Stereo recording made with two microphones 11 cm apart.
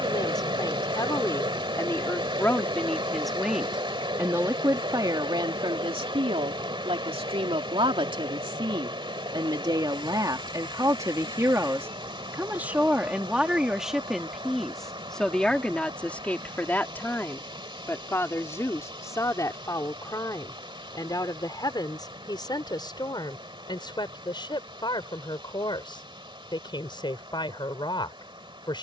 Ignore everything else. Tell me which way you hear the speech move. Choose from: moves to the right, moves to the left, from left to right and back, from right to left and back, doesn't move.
from left to right and back.